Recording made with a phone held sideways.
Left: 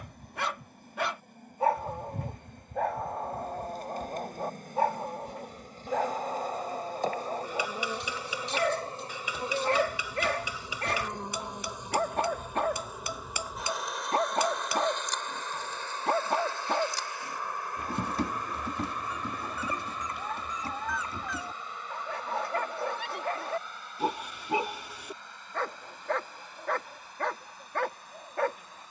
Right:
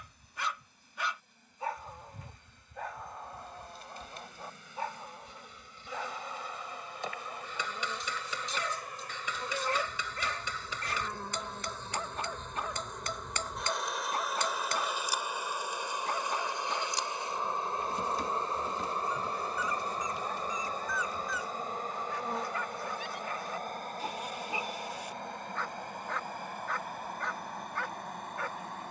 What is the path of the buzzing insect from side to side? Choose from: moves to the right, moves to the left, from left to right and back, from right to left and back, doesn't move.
moves to the right.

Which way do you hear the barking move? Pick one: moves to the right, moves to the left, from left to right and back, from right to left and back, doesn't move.
doesn't move.